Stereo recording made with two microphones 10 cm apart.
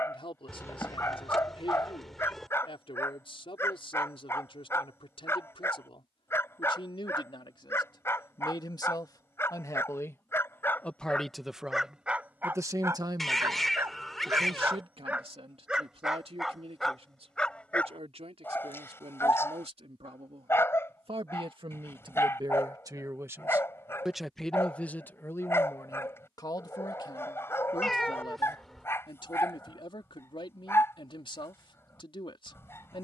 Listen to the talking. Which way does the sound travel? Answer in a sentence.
In this clip you hear the talking go right and come back.